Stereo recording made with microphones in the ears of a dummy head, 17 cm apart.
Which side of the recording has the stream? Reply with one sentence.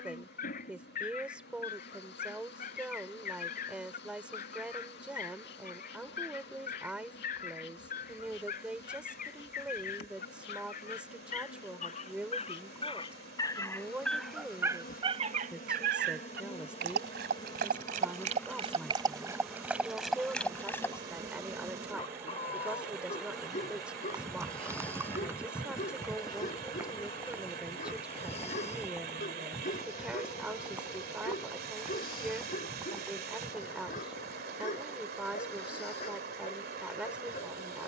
You can hear the stream on the right.